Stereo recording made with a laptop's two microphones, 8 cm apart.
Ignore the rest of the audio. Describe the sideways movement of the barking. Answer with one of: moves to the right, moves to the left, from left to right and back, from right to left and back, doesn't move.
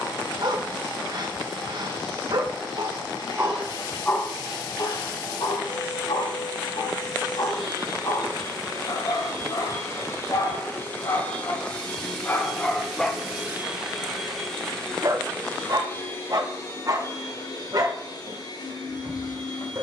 from right to left and back.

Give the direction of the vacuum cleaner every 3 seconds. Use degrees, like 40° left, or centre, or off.
60° left, 60° left, 50° left, 30° left, centre, 30° left, 60° left.